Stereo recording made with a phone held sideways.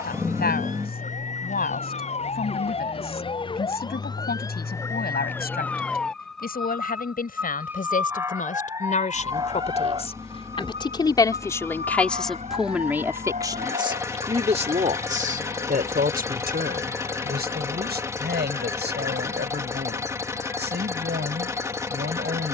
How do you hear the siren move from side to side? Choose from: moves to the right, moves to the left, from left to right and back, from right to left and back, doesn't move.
moves to the right.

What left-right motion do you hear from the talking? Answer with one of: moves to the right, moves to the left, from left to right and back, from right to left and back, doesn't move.
moves to the right.